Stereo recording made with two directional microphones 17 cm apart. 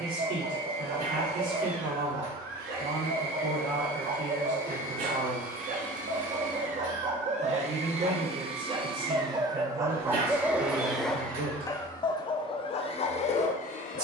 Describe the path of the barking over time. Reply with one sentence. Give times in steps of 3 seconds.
You can hear the barking on the right from 0 s, in the centre from 9 s and on the left from 12 s.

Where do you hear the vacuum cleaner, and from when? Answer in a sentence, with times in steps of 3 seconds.
You can hear the vacuum cleaner on the right from 0 s, in the centre from 9 s and on the left from 12 s.